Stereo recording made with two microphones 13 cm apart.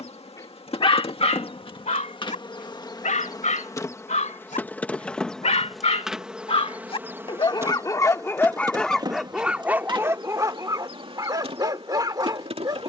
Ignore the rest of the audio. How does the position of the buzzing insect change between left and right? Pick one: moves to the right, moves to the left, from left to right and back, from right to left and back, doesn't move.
moves to the right.